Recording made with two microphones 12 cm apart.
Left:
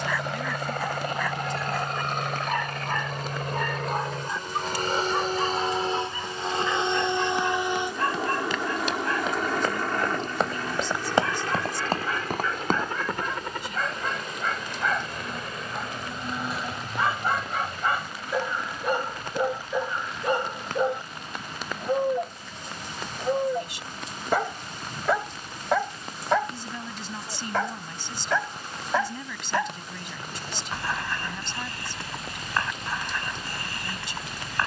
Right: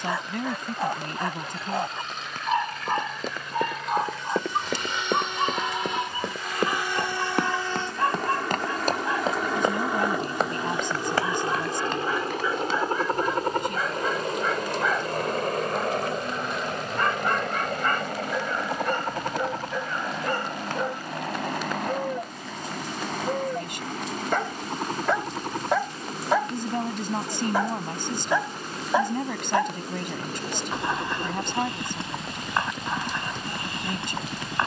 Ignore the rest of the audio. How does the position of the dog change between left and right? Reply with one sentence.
You can hear the dog go left and come back.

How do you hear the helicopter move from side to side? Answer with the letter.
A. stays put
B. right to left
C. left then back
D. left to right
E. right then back
D.